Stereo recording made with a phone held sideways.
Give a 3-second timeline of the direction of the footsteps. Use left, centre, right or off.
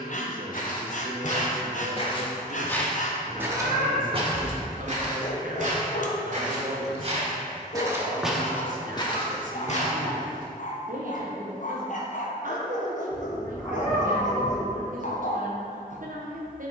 left, right, right, left, off, off.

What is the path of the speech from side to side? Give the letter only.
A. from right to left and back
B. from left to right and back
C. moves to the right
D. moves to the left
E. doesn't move
E.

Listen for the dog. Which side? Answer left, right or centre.
left.